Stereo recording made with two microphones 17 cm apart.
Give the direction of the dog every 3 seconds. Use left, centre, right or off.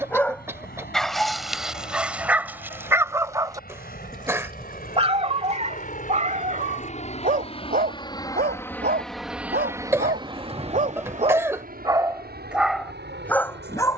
centre, right, right, right, centre.